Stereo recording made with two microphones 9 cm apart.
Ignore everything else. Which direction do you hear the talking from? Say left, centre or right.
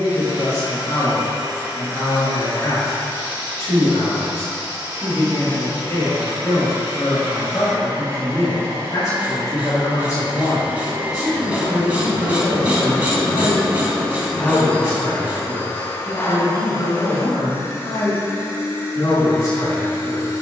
left.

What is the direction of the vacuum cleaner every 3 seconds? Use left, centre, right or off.
right, right, right, right, centre, left, left.